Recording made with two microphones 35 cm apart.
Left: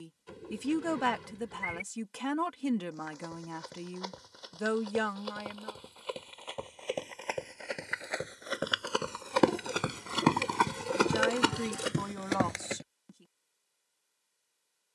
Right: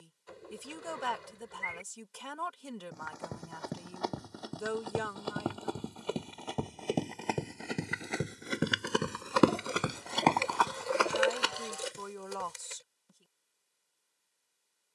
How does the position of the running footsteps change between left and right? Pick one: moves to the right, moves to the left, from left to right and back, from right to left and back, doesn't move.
moves to the left.